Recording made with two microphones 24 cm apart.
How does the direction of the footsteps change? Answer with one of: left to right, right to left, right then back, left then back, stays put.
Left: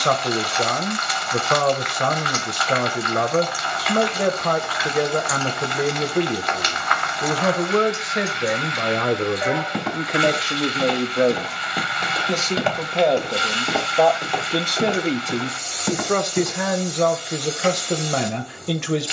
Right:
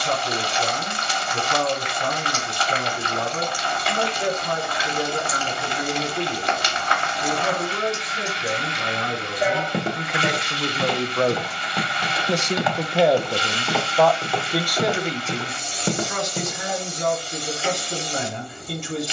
left then back.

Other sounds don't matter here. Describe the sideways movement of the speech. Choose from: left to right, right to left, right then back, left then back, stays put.
right then back.